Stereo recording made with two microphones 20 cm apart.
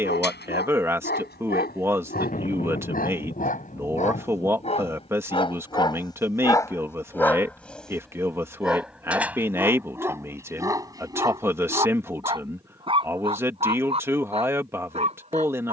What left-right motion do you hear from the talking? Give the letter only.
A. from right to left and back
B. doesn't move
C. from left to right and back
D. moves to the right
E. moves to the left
B.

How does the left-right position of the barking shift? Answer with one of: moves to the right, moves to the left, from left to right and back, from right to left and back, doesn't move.
moves to the right.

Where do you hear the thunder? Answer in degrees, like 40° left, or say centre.
40° left.